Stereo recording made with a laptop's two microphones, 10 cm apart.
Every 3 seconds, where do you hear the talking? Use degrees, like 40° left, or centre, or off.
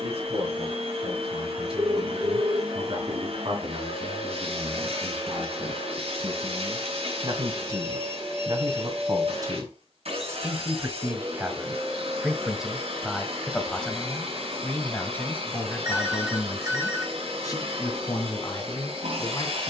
70° right, 60° right, 50° right, 30° right, centre, 30° left, 40° left.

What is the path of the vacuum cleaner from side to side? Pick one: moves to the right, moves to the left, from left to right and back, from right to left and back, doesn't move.
doesn't move.